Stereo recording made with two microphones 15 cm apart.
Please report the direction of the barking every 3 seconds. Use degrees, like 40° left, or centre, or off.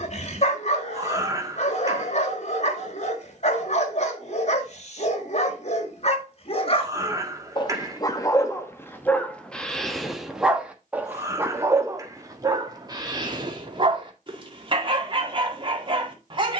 50° left, 50° left, 30° left, centre, 30° right, 30° right.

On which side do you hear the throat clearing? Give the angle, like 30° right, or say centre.
20° right.